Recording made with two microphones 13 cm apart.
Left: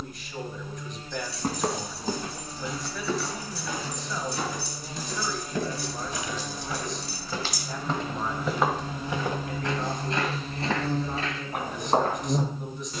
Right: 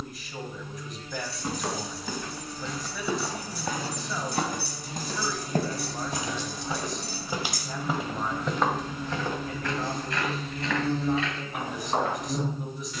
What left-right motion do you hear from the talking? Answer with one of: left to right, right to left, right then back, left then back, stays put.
stays put.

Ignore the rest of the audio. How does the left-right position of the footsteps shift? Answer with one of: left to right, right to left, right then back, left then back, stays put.
right then back.